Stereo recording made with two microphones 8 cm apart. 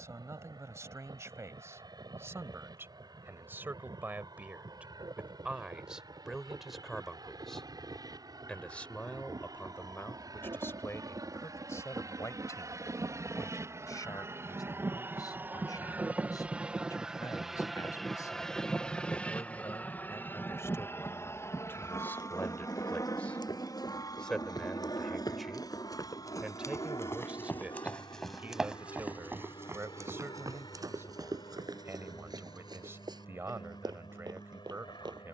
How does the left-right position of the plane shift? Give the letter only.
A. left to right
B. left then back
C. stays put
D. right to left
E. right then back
D.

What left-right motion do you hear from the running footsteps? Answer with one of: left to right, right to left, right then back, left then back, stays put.
left to right.